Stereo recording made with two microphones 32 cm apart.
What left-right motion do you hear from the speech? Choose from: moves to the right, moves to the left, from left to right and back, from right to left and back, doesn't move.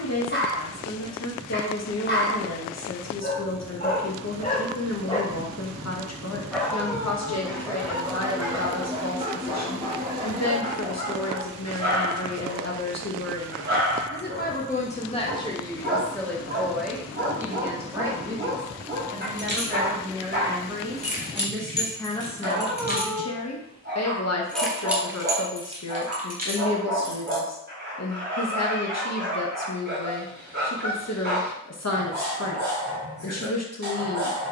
from left to right and back.